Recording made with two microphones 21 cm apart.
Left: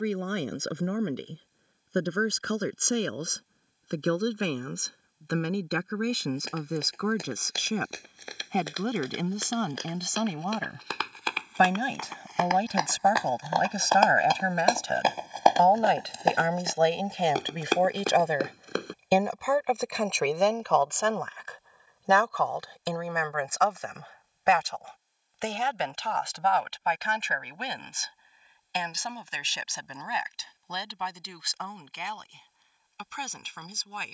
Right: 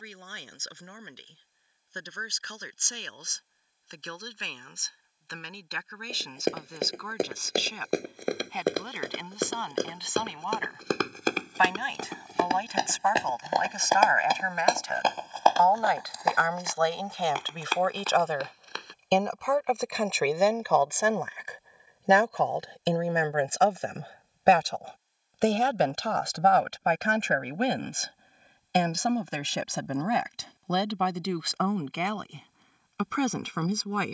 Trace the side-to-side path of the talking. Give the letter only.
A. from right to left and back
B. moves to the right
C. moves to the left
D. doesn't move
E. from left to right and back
B.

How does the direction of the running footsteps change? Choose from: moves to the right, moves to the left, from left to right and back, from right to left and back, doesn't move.
moves to the left.